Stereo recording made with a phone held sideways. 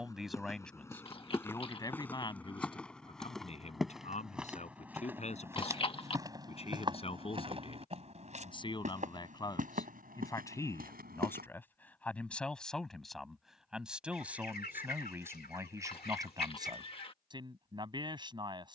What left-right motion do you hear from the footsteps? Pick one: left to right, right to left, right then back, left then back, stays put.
left to right.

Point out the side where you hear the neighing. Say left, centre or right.
left.